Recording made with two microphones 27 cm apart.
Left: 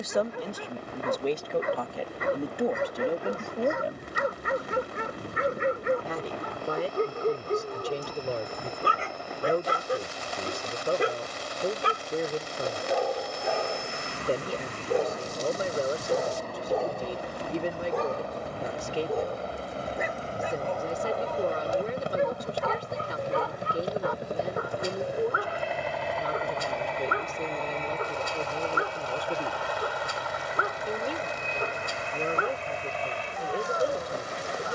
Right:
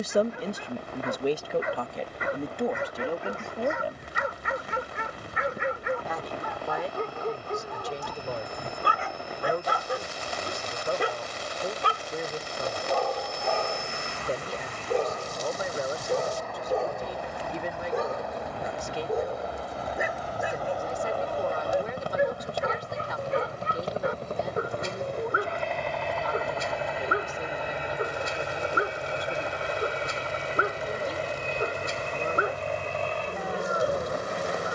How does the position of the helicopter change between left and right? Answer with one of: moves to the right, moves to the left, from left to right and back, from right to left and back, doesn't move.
moves to the right.